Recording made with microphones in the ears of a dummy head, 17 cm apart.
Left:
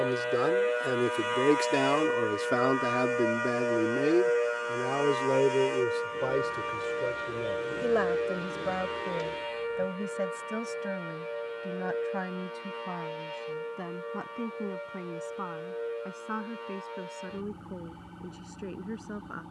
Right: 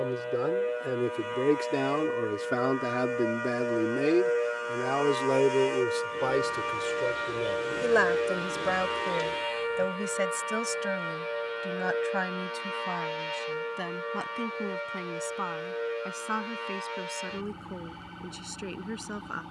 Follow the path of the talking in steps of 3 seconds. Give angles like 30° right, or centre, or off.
30° left, 20° right, 50° right, 60° right, 70° right, 70° right, 70° right.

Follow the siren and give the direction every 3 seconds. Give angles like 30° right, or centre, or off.
40° left, 10° left, 20° right, 40° right, 50° right, 60° right, 60° right.